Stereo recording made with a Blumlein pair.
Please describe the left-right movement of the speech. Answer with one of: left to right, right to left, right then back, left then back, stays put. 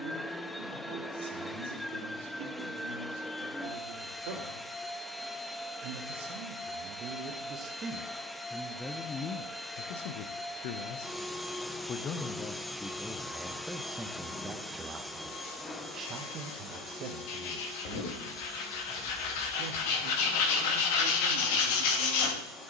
left then back.